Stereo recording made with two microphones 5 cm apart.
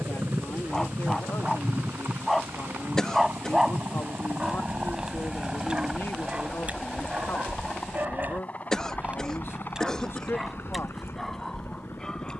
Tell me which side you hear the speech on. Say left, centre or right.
left.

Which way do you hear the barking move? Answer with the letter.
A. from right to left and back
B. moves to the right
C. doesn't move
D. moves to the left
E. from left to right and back
E.